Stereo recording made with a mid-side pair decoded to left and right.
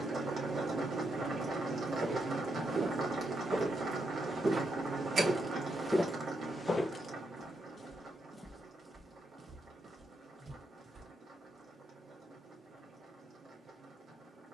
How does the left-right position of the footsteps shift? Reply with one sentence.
You can hear the footsteps go left and come back.